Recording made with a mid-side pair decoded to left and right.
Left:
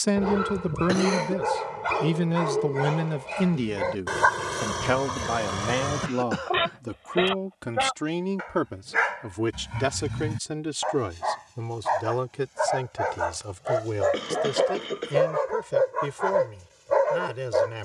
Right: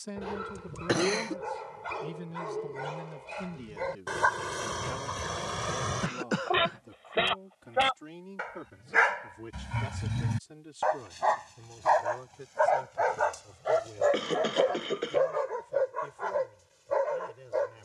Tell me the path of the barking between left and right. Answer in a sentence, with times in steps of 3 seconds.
You can hear the barking on the left from 0 s, in the centre from 6 s and on the left from 15 s.